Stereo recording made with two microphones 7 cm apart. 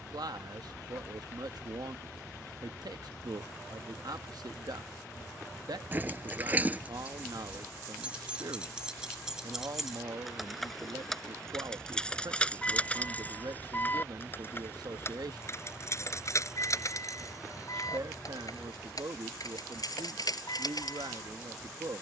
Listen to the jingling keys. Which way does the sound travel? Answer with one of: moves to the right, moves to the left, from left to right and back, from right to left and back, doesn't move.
moves to the left.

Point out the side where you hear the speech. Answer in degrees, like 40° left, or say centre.
70° right.